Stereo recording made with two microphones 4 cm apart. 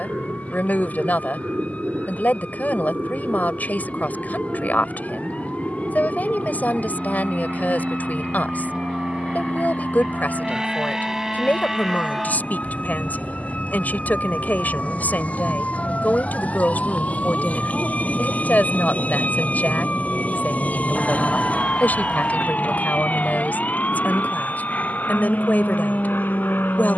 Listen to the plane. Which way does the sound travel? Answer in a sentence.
In this clip you hear the plane travel towards the left.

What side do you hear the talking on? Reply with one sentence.
You can hear the talking on the left.